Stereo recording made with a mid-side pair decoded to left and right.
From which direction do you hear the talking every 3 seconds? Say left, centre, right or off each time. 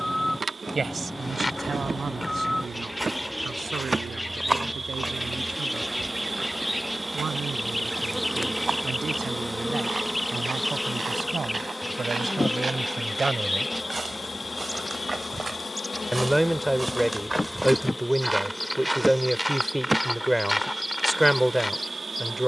right, right, right, right, right, centre, centre, centre.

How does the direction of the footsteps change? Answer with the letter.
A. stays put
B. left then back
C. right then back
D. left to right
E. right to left
C.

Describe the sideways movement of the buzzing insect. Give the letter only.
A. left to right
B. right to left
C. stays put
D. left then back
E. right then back
D.